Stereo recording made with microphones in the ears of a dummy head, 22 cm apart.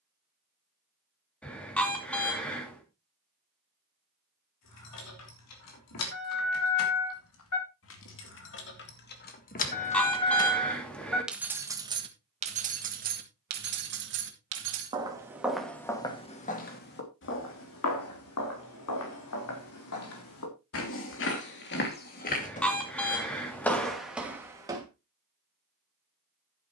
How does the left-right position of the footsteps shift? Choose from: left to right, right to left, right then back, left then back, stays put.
left then back.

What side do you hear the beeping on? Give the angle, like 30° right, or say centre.
10° left.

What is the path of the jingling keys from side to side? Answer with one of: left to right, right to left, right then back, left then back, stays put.
left to right.